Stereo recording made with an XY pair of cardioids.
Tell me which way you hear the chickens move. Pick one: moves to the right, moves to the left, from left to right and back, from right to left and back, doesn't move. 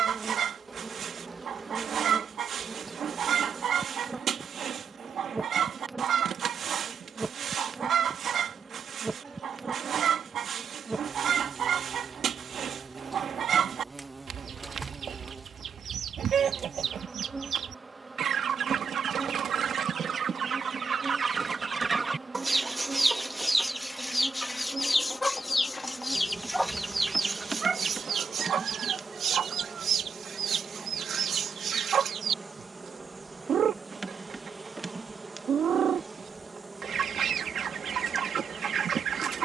from right to left and back.